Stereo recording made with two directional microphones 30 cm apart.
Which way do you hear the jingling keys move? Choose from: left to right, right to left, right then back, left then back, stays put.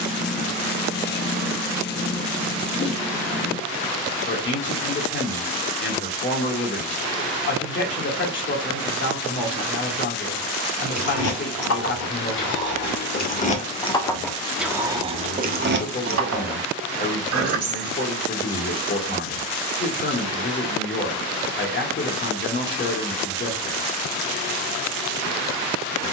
left to right.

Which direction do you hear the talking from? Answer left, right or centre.
left.